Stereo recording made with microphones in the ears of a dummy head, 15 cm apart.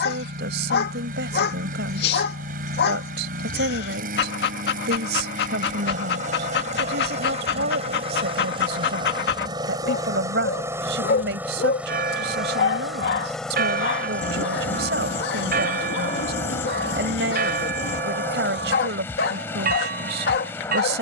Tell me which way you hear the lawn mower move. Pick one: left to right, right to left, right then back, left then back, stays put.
right to left.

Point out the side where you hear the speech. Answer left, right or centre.
right.